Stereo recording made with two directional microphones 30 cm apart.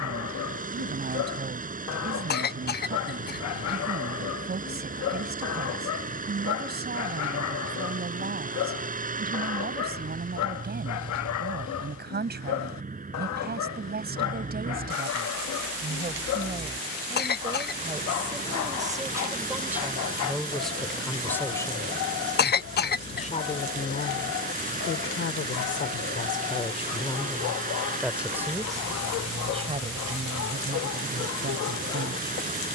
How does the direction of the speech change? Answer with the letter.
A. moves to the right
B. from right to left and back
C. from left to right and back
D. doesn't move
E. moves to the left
B.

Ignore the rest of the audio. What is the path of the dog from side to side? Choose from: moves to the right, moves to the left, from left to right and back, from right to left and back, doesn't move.
doesn't move.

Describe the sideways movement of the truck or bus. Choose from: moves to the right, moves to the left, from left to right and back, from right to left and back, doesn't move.
doesn't move.